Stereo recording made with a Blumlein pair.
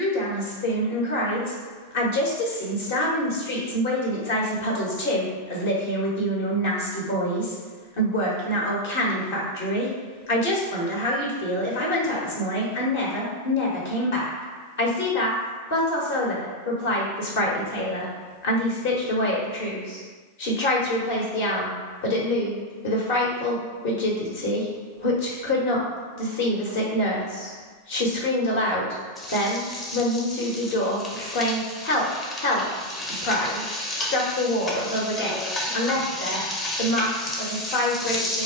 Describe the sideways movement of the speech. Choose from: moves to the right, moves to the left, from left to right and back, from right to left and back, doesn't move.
doesn't move.